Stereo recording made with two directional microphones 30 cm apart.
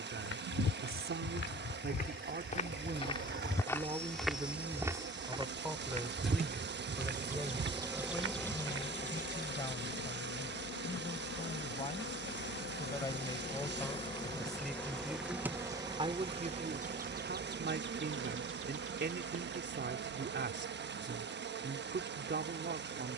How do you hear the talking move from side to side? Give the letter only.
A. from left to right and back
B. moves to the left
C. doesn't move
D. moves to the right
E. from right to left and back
E.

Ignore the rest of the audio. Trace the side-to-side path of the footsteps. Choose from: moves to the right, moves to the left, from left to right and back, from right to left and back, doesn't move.
moves to the right.